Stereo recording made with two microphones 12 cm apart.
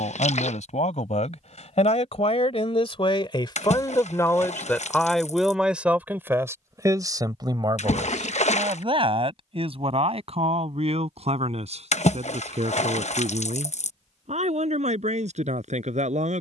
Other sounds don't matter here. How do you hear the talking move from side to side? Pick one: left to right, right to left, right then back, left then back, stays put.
left to right.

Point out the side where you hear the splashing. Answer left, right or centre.
left.